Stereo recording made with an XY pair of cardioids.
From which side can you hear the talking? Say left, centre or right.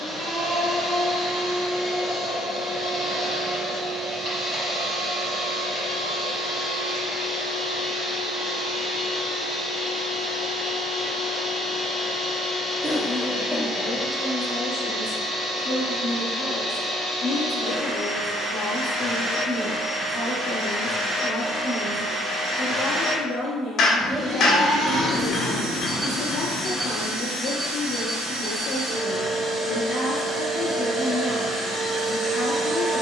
left.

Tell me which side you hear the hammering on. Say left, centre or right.
left.